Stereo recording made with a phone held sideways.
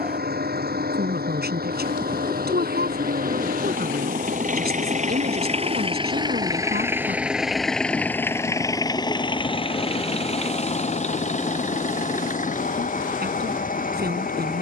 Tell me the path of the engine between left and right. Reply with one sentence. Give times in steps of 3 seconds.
You can hear the engine on the right from 0 s, in the centre from 6 s and on the left from 9 s.